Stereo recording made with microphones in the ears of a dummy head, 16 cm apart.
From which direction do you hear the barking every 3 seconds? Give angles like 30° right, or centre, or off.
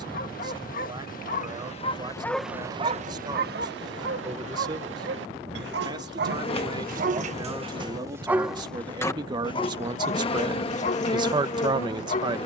30° left, 70° right, 30° right, 40° left.